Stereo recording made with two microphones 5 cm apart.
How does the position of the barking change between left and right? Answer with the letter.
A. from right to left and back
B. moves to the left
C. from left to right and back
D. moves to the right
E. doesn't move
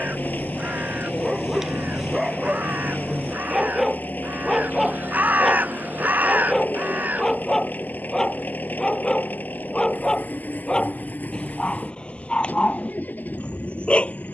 B.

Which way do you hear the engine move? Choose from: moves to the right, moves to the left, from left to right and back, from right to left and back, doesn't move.
doesn't move.